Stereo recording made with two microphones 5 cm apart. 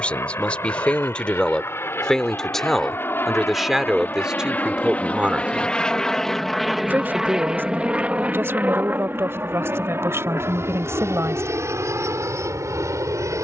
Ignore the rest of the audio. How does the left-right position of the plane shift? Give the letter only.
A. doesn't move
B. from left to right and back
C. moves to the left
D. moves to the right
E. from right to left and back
D.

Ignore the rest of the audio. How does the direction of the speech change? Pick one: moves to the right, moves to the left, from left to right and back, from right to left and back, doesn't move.
moves to the right.